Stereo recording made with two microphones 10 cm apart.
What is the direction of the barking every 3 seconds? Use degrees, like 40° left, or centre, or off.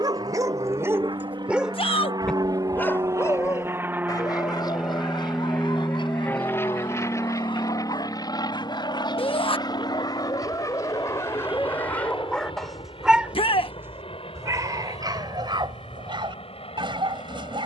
10° right, 50° left, 60° left, 40° left, 10° right, 50° right.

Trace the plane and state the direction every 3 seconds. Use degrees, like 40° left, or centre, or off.
50° right, 10° right, 30° left, 50° left, 60° left, 60° left.